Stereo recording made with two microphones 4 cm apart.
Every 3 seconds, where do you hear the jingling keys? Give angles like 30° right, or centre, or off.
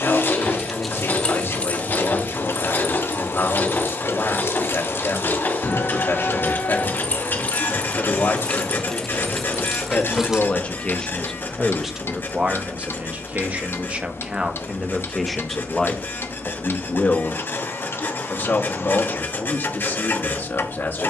30° left, 60° left, 30° left, centre, off, off, off.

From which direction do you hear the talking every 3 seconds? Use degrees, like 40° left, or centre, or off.
60° left, 60° left, 60° left, 20° left, 30° right, 20° left, 50° left.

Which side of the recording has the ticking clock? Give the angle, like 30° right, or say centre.
60° left.